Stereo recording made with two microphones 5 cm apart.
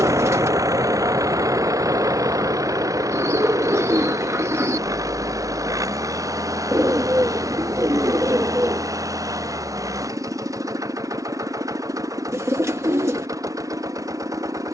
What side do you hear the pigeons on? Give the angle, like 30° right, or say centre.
60° right.